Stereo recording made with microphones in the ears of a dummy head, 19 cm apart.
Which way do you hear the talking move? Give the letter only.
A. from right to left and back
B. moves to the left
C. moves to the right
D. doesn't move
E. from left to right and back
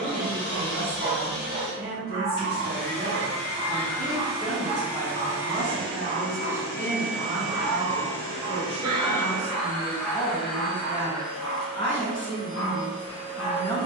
B.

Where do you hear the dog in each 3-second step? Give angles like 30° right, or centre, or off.
40° right, 40° right, 30° right, 10° left, 30° left.